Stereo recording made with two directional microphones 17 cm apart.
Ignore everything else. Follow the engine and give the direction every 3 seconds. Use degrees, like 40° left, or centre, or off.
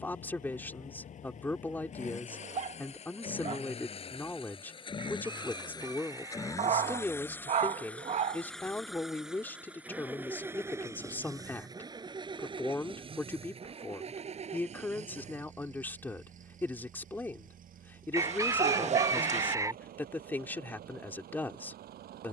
50° left, 30° left, 10° left, 10° right, 30° right, 50° right, 60° right, 60° right.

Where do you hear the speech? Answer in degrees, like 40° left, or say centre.
10° left.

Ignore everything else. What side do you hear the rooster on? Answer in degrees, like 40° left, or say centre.
20° right.